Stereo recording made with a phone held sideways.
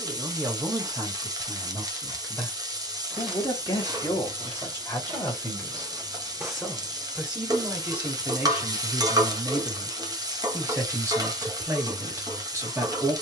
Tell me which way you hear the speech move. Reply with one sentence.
You can hear the speech move from right to left and back again.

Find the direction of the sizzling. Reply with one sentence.
You can hear the sizzling on the right.